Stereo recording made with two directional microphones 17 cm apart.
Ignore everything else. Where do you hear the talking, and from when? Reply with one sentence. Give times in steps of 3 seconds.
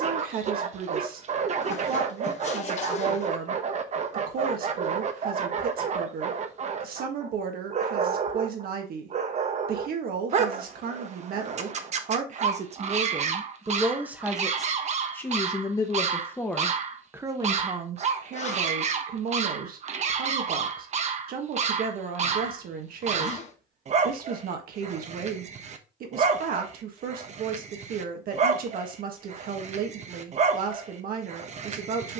You can hear the talking on the right from 0 s, in the centre from 15 s and on the right from 18 s.